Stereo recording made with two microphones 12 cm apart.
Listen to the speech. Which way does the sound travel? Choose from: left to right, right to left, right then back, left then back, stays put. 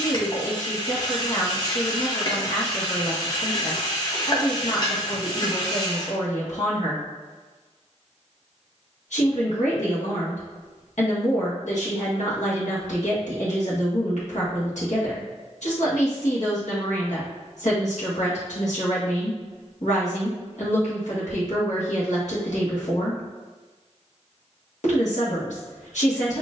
stays put.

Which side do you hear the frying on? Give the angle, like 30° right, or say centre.
30° left.